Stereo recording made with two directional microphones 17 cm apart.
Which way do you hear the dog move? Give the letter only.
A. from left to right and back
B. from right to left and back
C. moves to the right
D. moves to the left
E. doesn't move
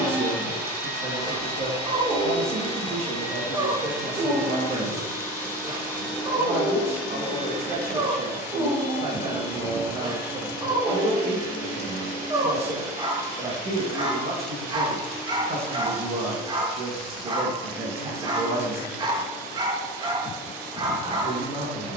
E.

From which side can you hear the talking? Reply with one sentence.
In this clip you hear the talking on the right.